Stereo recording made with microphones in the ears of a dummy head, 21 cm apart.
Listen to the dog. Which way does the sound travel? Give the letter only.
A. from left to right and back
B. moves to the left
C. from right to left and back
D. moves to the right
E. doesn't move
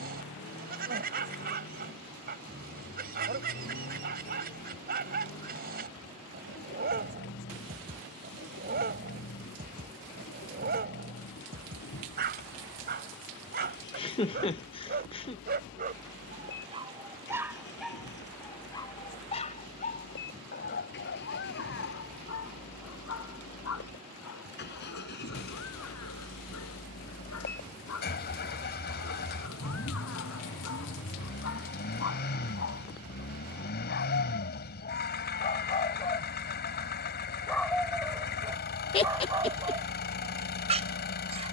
C.